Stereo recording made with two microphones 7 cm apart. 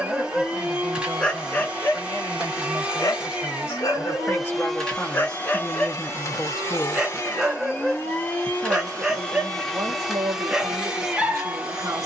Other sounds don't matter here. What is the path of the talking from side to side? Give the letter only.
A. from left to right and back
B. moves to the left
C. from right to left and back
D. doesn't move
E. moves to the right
E.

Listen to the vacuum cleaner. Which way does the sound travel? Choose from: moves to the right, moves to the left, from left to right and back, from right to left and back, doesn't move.
from right to left and back.